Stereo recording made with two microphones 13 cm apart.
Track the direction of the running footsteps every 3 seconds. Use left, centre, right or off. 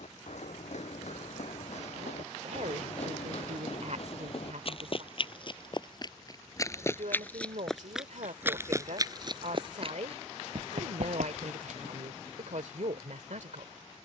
left, left, centre, right, off.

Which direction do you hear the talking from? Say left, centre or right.
right.